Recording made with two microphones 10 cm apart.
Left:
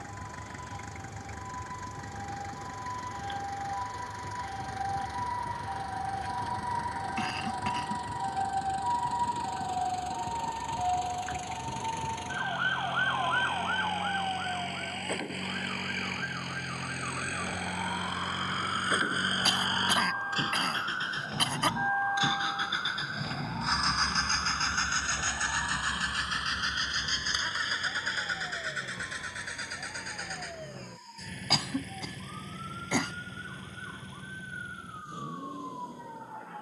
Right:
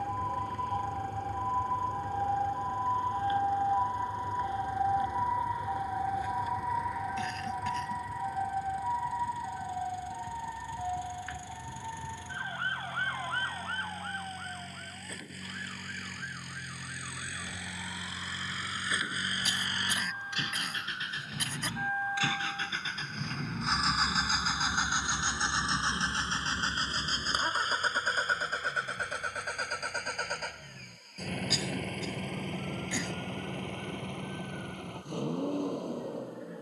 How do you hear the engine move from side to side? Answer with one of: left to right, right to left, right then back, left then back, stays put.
left to right.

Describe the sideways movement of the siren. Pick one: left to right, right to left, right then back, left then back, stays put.
right to left.